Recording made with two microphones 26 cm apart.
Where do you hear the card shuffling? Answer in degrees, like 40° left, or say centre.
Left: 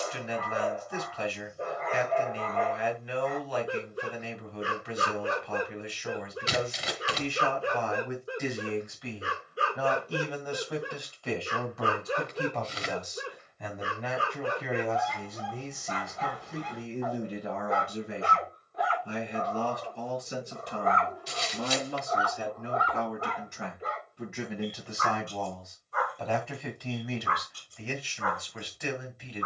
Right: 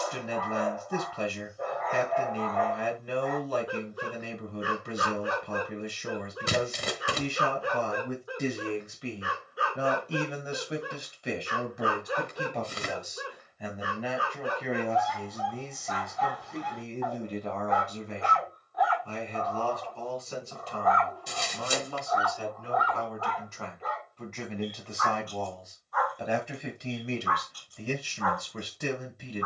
50° right.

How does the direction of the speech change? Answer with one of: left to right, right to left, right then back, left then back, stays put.
left then back.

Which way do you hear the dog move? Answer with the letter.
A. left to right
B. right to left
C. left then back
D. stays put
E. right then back
D.